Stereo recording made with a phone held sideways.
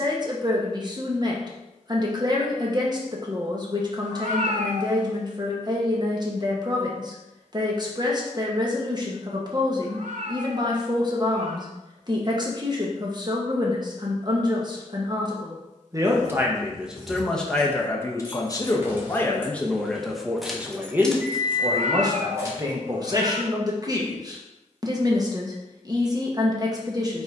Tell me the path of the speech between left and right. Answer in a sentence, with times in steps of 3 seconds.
In this clip you hear the speech on the right from 0 s, in the centre from 15 s and on the right from 21 s.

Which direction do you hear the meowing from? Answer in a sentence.
In this clip you hear the meowing on the right.